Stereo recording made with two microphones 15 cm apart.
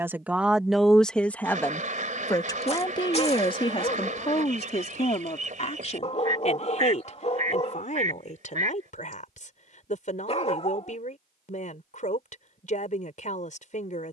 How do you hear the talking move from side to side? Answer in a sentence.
You can hear the talking move to the left.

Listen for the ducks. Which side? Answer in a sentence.
In this clip you hear the ducks on the right.